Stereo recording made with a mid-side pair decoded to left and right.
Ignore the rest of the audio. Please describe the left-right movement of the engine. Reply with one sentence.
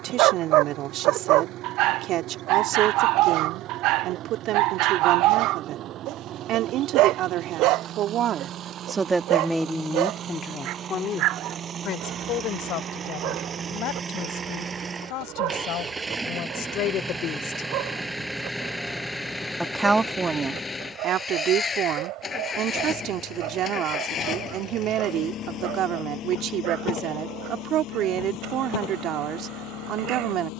You can hear the engine go from the right side to the left.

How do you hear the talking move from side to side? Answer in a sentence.
In this clip you hear the talking move from right to left and back again.